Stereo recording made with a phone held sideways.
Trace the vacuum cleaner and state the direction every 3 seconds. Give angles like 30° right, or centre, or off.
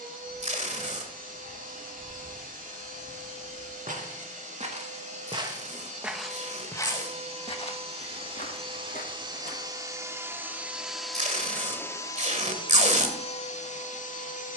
60° right, 60° right, 40° right, 10° right, 40° left.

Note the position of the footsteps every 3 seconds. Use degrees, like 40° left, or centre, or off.
70° right, 50° right, 40° left, 60° left, off.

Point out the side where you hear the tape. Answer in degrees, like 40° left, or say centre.
50° right.